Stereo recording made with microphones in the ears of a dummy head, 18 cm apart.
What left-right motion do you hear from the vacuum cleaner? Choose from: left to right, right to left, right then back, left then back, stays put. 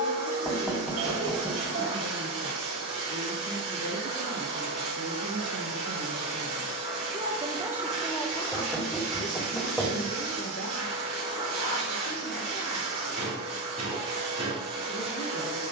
stays put.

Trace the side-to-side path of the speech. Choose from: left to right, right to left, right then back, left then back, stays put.
right to left.